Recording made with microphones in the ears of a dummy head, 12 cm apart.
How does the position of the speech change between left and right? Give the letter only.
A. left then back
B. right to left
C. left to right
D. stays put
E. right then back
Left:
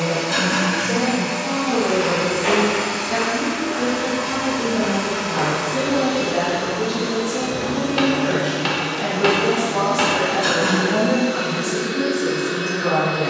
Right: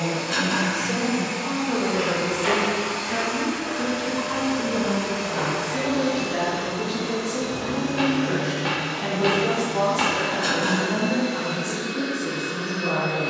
B.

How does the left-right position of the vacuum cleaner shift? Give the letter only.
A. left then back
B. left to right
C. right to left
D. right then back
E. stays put
E.